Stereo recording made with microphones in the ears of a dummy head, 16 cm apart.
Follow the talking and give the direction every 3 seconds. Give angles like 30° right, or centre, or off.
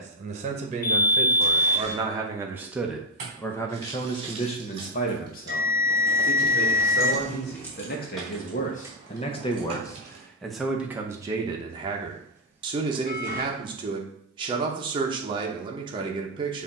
30° right, 30° left, 60° left, centre, 30° right, 30° right.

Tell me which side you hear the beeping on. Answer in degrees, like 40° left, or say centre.
50° left.